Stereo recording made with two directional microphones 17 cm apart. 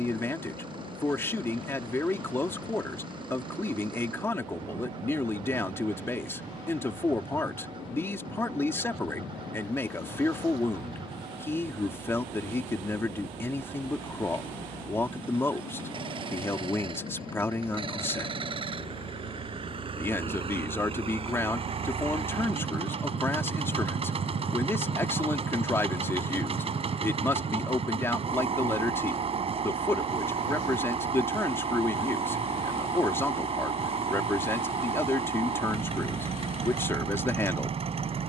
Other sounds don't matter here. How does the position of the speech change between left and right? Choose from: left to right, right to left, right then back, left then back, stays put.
stays put.